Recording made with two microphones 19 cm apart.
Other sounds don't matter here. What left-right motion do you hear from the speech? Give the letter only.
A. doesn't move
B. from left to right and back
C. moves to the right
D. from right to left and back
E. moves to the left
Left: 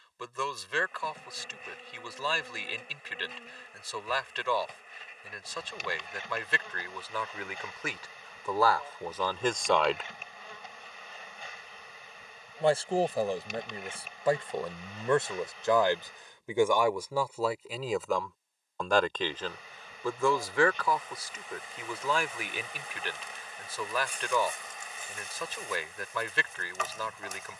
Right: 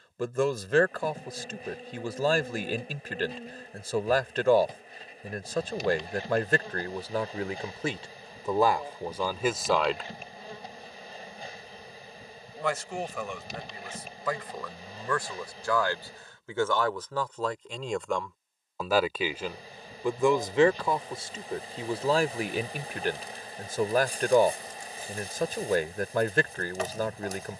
D.